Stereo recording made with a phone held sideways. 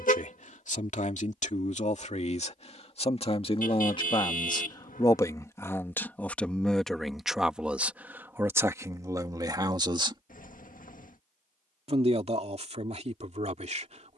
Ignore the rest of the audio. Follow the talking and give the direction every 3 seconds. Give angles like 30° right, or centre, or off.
50° left, 30° left, centre, 30° right, 50° right.